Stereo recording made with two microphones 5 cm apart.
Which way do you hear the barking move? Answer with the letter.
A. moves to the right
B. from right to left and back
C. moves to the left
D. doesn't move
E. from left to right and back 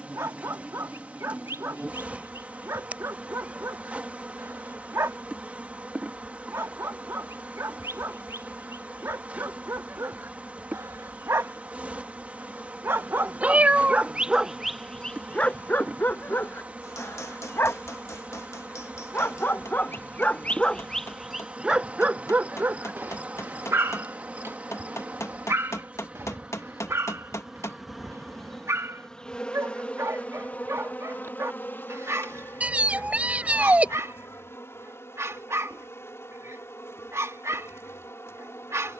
B.